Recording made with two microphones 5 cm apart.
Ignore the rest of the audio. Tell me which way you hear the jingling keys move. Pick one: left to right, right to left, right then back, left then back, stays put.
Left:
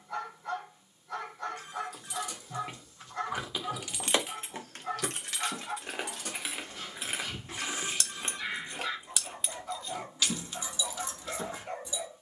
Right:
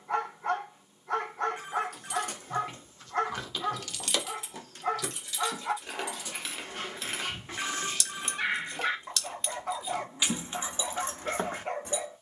left then back.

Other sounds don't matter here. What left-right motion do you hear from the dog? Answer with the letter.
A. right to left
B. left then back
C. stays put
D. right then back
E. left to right
C.